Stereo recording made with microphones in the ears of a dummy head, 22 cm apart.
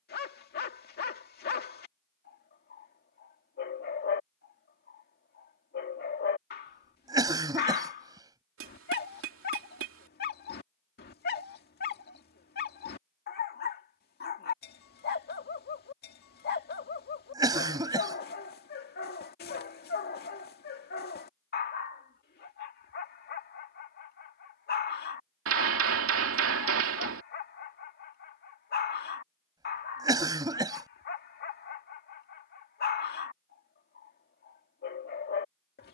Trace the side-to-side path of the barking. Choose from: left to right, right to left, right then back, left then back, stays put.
stays put.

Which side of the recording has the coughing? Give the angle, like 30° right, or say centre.
20° right.